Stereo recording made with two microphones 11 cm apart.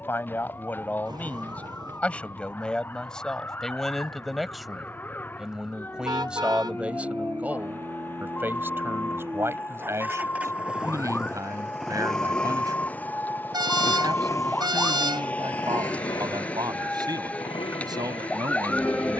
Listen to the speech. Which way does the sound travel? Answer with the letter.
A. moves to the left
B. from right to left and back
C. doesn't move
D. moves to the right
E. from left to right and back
D.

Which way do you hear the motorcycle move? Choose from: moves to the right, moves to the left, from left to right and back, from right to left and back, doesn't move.
moves to the left.